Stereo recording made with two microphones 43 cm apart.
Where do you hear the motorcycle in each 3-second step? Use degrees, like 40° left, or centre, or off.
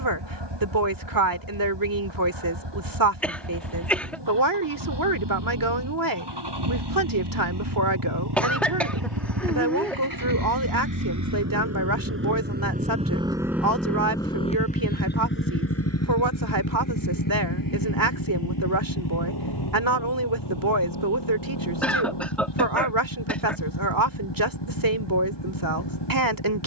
80° right, 70° right, 70° right, 50° right, centre, 40° left, 60° left, 70° left, 70° left.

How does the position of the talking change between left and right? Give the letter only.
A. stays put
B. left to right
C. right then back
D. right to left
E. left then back
A.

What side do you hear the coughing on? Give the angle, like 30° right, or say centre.
centre.